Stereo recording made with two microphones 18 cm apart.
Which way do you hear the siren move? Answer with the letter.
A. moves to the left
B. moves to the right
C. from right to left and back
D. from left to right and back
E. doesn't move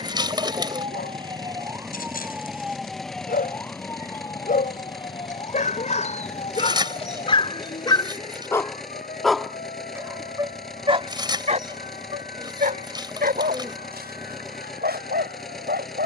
A.